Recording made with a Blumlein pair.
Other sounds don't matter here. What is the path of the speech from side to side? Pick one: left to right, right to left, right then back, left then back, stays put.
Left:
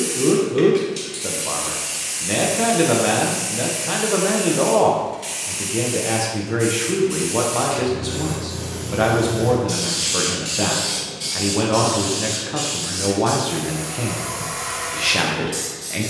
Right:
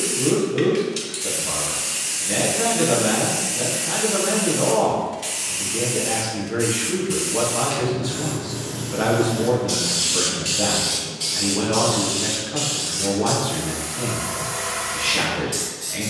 stays put.